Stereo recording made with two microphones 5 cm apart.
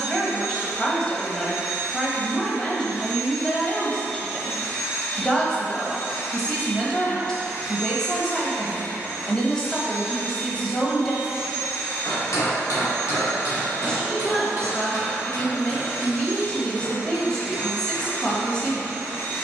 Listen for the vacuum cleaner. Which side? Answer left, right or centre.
left.